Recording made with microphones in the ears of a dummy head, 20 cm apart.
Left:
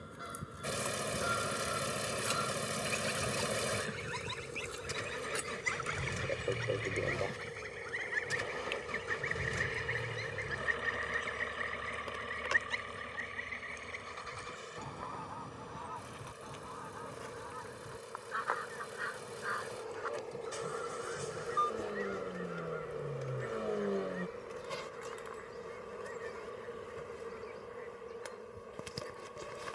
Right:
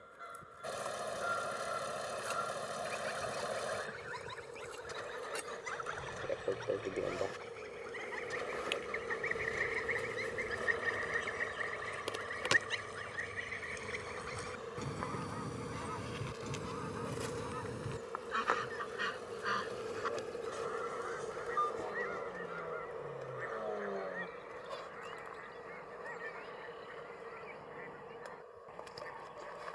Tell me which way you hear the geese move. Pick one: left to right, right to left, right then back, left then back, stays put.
left to right.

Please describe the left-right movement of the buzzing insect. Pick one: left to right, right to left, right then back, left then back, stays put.
right then back.